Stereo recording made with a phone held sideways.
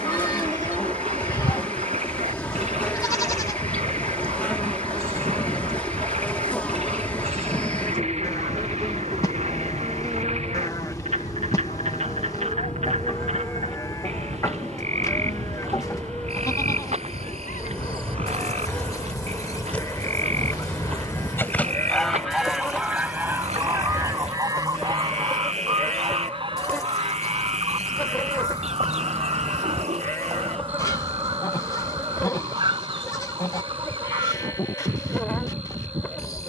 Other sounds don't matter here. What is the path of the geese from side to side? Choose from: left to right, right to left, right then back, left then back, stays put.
left to right.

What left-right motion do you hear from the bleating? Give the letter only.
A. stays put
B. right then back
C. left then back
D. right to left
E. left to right
A.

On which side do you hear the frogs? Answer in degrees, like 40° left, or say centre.
50° right.